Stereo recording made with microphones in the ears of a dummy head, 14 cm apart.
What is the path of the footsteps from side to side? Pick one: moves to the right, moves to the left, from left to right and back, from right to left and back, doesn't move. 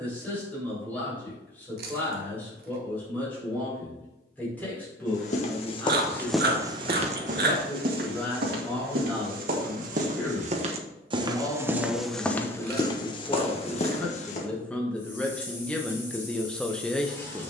from left to right and back.